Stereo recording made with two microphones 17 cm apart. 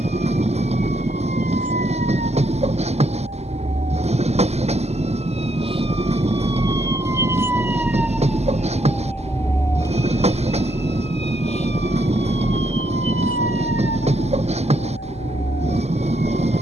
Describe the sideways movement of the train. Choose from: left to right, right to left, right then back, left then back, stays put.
stays put.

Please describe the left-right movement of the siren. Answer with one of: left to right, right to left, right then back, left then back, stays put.
right to left.